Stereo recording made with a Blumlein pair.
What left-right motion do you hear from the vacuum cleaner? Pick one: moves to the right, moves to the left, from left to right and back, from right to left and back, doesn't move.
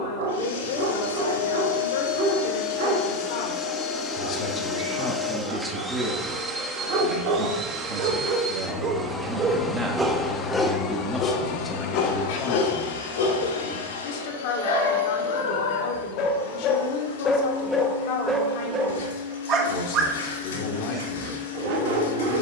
from left to right and back.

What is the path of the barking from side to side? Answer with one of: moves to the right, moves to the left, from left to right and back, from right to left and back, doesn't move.
from right to left and back.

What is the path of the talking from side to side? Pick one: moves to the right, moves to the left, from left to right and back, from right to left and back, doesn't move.
from left to right and back.